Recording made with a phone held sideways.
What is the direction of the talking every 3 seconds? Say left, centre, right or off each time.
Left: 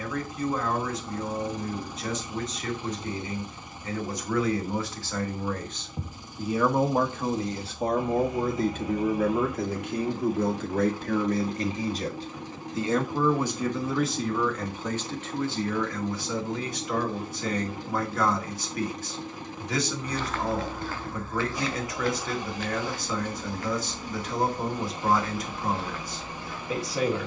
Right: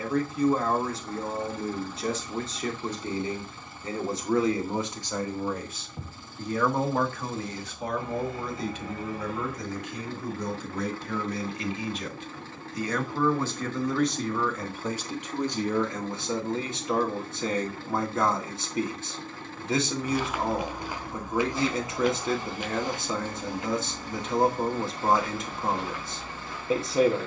right, right, left, left, centre, right, right, right, right.